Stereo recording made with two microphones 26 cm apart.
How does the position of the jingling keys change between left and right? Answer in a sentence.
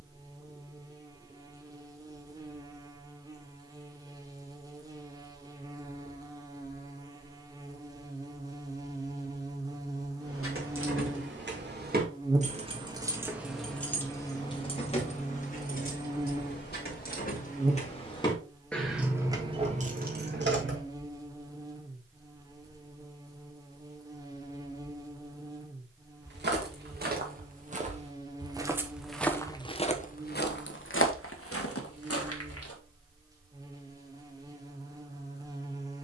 You can hear the jingling keys go left and come back.